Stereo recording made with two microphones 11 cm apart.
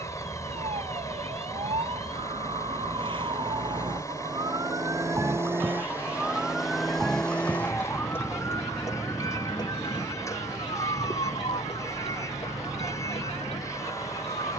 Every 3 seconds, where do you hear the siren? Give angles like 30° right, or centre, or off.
60° right, 30° right, 10° left, 40° left, 60° left.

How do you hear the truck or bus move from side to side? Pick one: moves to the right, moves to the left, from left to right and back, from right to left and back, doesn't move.
doesn't move.